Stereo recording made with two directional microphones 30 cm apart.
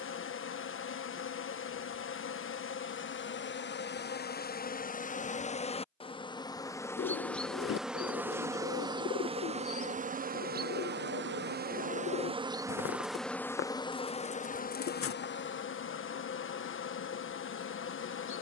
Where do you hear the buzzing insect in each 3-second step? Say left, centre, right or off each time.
left, left, centre, right, centre, left.